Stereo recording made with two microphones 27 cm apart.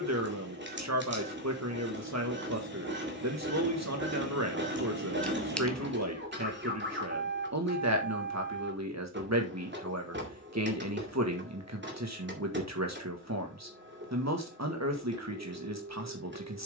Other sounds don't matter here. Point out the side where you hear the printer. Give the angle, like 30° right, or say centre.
40° right.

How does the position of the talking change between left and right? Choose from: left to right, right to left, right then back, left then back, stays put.
stays put.